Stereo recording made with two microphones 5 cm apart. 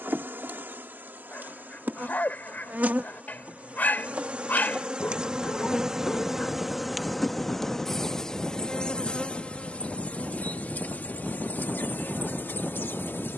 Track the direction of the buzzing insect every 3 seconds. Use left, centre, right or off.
right, right, centre, left, left.